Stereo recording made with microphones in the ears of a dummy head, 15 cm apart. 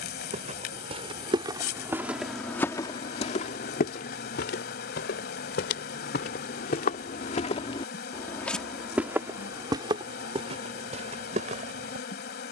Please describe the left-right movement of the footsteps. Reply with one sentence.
In this clip you hear the footsteps go left and come back.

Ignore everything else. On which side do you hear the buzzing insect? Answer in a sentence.
In this clip you hear the buzzing insect on the left.